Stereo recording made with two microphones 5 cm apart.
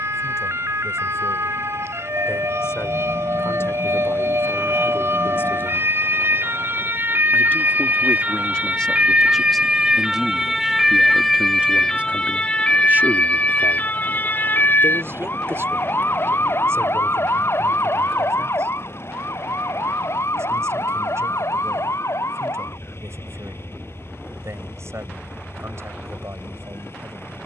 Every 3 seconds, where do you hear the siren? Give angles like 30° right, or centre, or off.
70° right, 60° right, 40° right, 10° right, 30° left, 50° left, 60° left, 70° left, 70° left.